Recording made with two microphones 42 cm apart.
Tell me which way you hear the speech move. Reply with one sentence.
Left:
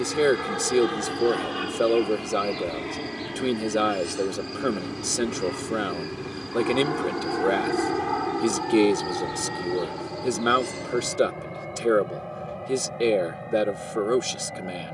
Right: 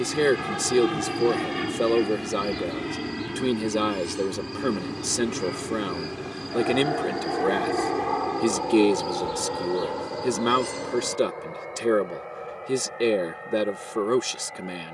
In this clip you hear the speech stay in one place.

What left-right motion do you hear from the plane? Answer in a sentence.
In this clip you hear the plane go from the right side to the left.